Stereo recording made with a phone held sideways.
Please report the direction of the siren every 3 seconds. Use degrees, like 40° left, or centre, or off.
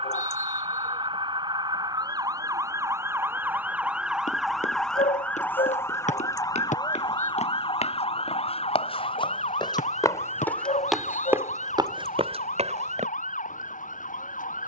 30° right, centre, 40° left, 60° left, 70° left.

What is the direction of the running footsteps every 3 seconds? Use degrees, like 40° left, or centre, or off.
off, 60° left, 60° left, 10° left, 50° right.